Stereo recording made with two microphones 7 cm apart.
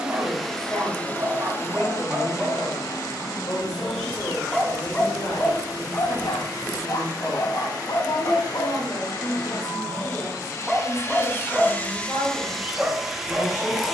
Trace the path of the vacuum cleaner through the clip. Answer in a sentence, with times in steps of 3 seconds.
You can hear the vacuum cleaner on the left from 0 s and in the centre from 12 s.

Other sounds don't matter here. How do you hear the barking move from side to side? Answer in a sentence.
In this clip you hear the barking move from right to left and back again.